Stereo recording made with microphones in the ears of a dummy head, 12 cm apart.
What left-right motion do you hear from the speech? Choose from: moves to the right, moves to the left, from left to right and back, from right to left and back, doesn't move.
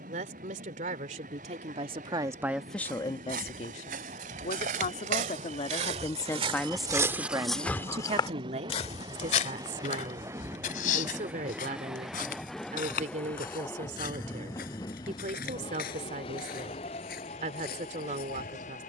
from right to left and back.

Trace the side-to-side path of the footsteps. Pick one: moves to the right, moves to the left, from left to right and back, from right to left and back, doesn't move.
moves to the left.